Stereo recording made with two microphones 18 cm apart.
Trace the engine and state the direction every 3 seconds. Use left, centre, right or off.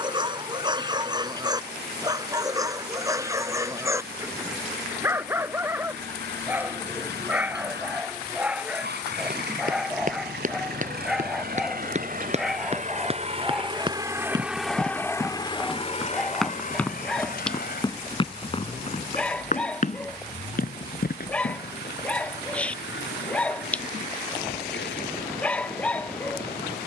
right, right, right, right, right, left, left, left, left.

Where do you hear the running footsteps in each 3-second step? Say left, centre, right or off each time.
off, off, off, right, right, centre, left, left, off.